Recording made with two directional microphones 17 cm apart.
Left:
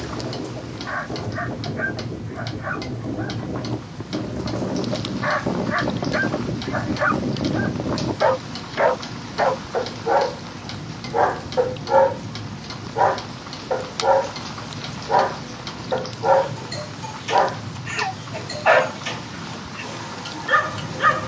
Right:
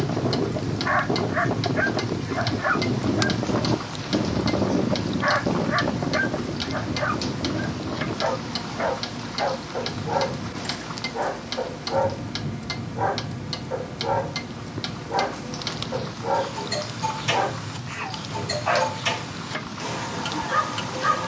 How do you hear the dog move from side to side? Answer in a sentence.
In this clip you hear the dog move from right to left.